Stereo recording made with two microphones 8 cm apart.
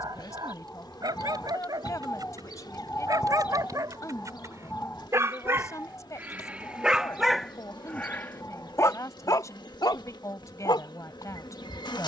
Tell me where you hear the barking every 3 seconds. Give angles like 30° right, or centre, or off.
60° right, 40° right, centre, 70° left.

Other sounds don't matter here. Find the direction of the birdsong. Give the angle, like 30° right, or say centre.
20° left.